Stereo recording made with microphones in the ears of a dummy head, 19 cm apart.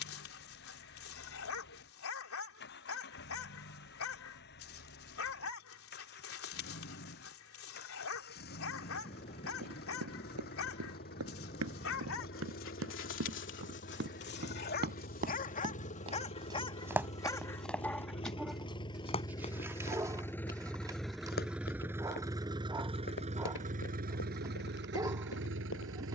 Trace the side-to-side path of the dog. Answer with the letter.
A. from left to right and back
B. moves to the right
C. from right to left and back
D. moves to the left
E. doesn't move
B.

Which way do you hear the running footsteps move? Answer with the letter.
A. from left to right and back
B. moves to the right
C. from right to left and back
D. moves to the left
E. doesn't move
D.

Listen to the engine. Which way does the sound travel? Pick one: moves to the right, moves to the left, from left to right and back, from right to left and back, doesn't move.
moves to the right.